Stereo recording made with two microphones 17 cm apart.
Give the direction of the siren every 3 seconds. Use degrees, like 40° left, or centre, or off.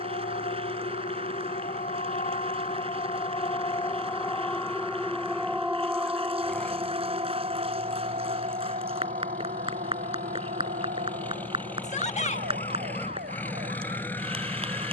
50° left, 10° left, 30° right, 60° right, 70° right.